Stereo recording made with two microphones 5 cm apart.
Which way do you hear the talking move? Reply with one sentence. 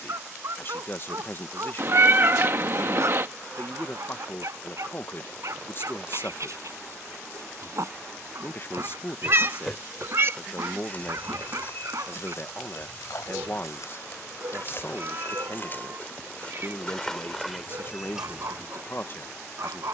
You can hear the talking stay put.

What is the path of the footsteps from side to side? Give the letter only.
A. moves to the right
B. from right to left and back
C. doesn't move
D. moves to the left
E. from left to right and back
B.